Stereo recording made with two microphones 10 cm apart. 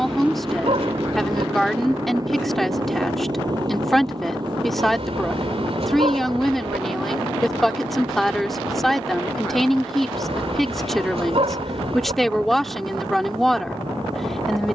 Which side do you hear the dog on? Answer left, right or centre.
right.